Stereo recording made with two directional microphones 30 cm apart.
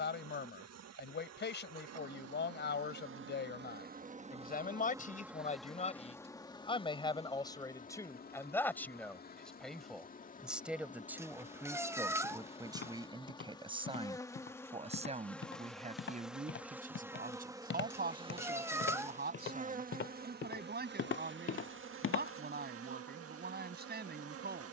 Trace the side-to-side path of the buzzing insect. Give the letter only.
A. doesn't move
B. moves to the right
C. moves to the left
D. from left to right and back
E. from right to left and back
E.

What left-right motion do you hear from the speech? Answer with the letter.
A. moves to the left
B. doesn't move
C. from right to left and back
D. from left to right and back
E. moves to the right
E.